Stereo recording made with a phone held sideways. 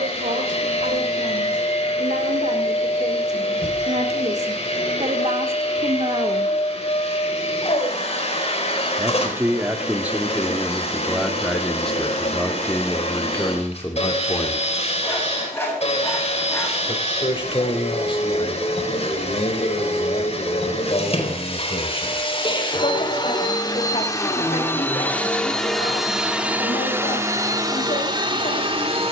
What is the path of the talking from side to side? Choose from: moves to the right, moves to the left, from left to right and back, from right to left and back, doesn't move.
moves to the left.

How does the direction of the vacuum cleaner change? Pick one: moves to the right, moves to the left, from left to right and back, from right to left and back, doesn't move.
moves to the right.